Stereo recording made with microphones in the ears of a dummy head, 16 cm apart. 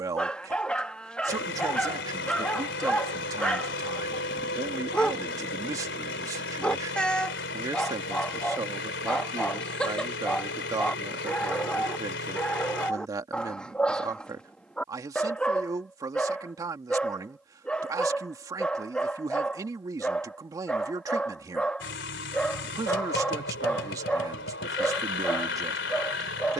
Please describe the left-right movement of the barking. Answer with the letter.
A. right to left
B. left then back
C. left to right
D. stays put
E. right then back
D.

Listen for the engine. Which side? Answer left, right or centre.
left.